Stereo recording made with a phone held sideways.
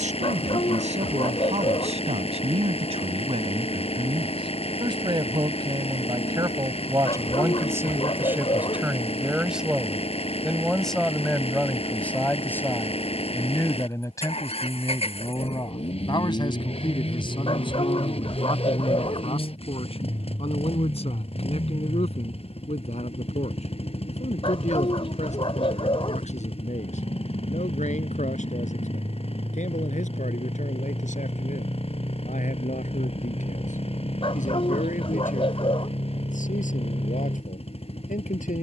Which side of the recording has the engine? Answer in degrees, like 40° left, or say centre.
40° left.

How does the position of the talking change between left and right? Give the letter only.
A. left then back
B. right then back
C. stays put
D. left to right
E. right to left
E.